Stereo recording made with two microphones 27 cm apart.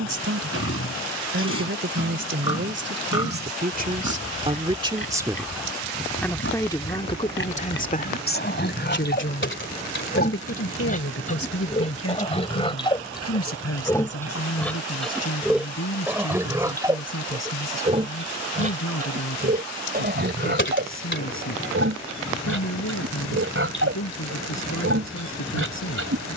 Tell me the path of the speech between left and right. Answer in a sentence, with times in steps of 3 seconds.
You can hear the speech on the right from 0 s and on the left from 6 s.